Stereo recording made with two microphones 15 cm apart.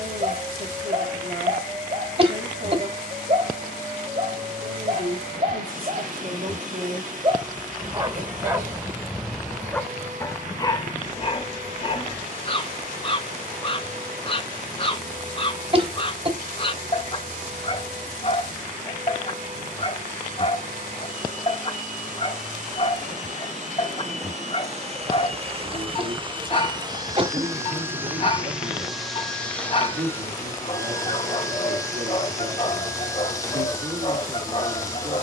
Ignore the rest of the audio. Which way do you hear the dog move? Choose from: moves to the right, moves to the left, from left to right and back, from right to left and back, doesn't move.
moves to the left.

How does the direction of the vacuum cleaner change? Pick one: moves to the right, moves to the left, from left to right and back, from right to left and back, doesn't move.
moves to the left.